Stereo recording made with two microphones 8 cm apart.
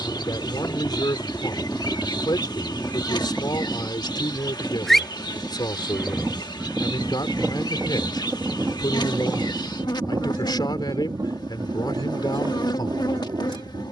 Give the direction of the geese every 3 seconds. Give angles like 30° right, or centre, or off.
20° left, 10° left, 20° right, 40° right, 60° right.